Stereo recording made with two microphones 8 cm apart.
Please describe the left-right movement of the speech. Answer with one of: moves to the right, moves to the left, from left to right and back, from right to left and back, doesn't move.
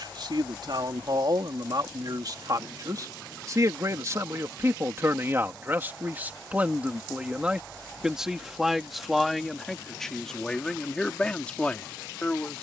moves to the left.